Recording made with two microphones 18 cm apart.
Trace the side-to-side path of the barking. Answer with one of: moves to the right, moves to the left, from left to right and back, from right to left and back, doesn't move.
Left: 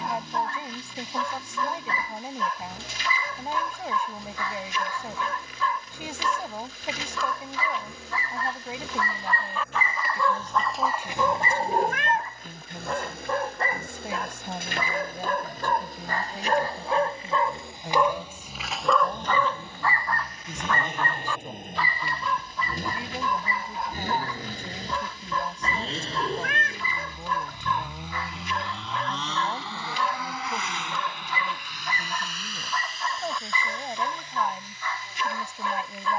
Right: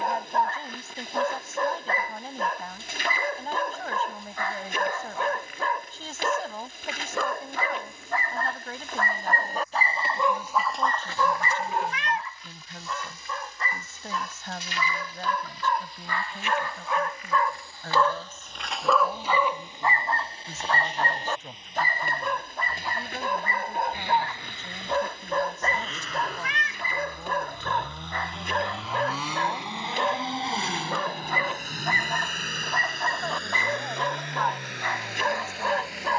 from right to left and back.